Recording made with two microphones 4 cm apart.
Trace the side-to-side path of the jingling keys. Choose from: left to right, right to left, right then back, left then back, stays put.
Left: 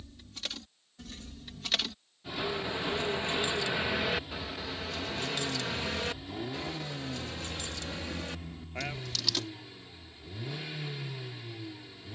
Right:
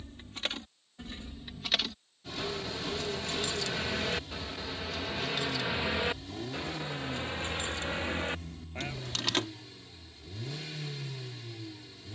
left then back.